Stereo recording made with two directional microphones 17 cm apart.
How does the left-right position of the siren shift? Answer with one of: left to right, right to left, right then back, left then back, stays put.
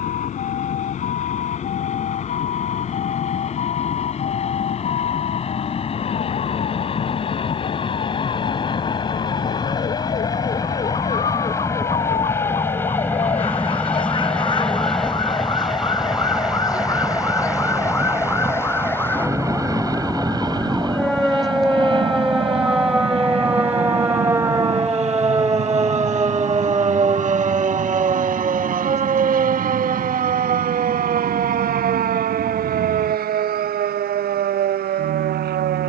left to right.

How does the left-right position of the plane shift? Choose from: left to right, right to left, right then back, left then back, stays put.
left to right.